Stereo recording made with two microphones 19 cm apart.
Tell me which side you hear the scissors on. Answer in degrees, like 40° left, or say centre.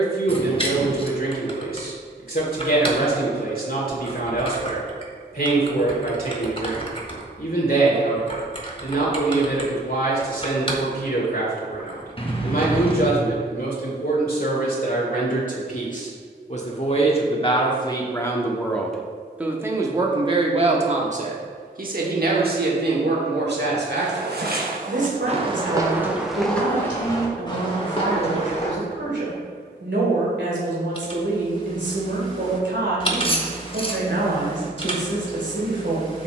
30° left.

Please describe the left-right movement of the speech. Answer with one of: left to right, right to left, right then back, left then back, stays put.
left to right.